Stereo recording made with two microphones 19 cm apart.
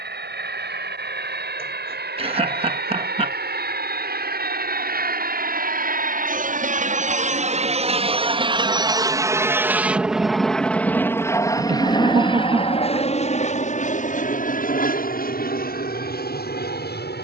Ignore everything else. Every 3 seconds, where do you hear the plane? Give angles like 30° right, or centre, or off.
70° right, 60° right, 40° right, centre, 40° left, 50° left.